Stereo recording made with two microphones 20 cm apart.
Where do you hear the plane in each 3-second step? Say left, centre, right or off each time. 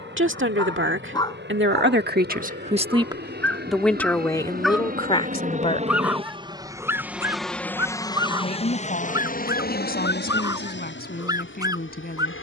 right, right, centre, left.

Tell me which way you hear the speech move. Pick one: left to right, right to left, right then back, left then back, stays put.
right to left.